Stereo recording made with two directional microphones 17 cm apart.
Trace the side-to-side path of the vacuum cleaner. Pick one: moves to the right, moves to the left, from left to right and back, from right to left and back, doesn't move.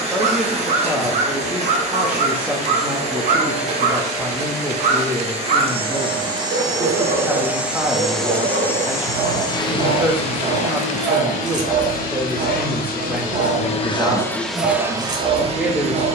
from right to left and back.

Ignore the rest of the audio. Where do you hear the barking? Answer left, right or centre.
right.